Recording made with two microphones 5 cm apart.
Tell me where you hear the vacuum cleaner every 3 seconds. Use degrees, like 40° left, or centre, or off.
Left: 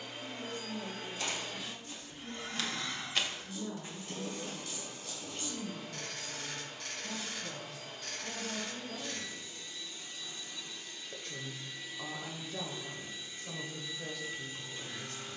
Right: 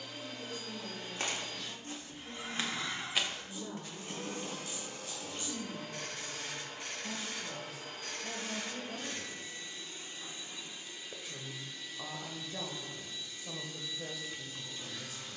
10° left, 50° right, 60° right, 20° right, 20° left.